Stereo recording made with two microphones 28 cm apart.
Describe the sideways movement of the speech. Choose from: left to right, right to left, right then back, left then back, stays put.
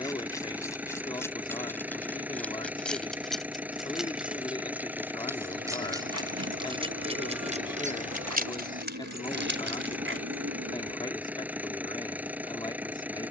stays put.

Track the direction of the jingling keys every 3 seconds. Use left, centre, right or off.
centre, centre, right, right, off.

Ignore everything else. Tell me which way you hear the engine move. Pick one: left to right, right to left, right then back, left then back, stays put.
stays put.